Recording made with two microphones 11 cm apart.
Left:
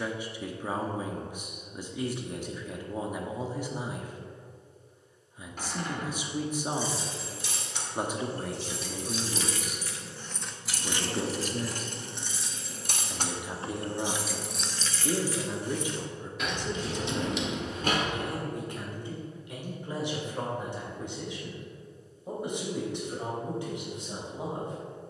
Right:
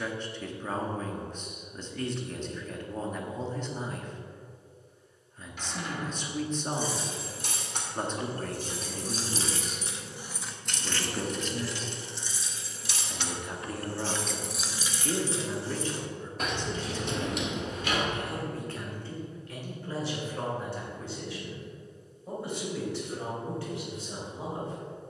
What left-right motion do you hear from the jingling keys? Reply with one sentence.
You can hear the jingling keys move from right to left and back again.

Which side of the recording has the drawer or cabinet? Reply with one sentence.
In this clip you hear the drawer or cabinet on the left.